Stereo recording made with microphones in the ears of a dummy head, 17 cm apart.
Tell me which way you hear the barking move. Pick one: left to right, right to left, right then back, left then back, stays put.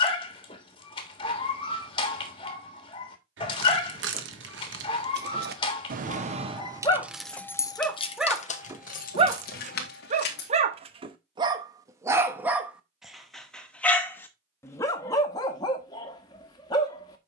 right then back.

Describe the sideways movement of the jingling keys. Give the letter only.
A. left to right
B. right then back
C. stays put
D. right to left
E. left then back
D.